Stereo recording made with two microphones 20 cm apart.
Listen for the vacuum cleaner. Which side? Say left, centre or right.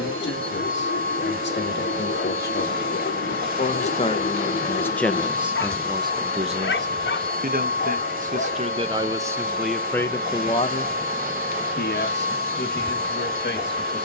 right.